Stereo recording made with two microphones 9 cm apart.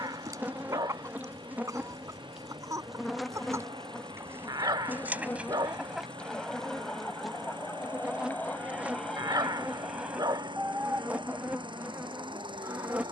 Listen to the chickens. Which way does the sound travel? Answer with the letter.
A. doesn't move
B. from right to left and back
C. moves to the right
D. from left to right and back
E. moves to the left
B.